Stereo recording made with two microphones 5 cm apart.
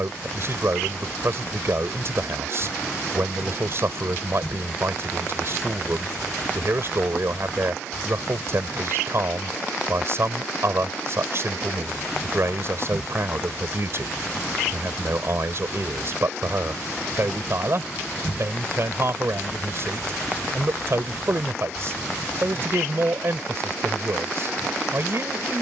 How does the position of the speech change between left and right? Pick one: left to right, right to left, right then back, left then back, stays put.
stays put.